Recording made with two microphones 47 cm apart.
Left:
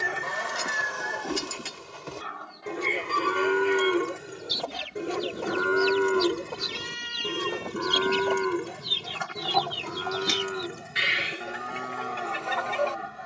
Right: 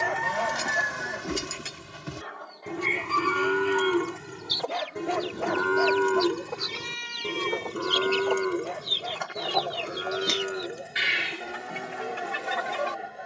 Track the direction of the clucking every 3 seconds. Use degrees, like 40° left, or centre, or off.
10° left, 50° left, 50° left, centre, 30° right.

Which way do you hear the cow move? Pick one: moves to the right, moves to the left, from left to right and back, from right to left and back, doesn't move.
moves to the left.